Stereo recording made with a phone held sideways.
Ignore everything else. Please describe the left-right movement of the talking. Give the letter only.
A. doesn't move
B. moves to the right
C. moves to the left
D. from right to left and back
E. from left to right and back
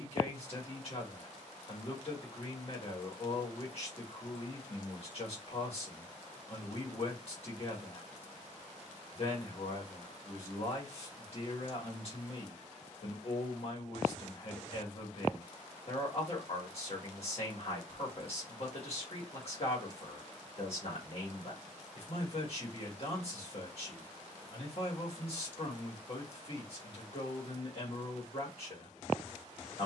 A.